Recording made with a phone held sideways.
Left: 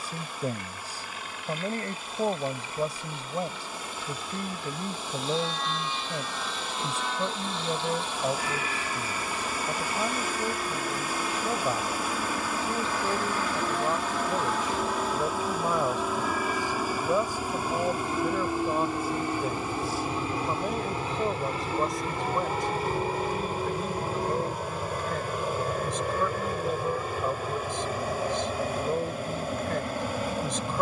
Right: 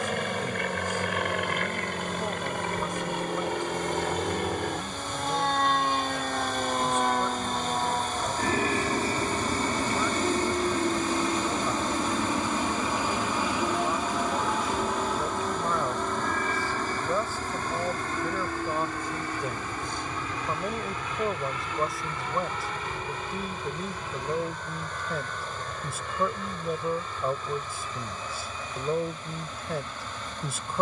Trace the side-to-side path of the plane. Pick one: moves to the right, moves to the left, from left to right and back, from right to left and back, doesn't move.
moves to the left.